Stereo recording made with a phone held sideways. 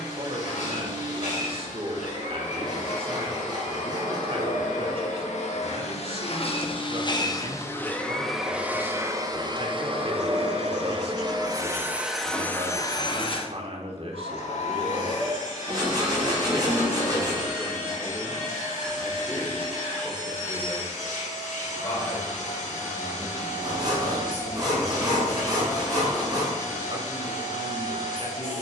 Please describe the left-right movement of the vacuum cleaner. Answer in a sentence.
In this clip you hear the vacuum cleaner move from left to right and back again.